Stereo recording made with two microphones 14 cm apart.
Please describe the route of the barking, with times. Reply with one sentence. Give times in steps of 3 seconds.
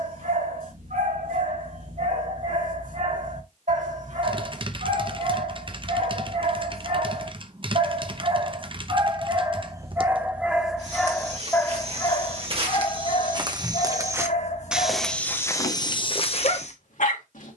You can hear the barking on the right from 0 s, in the centre from 9 s and on the left from 12 s.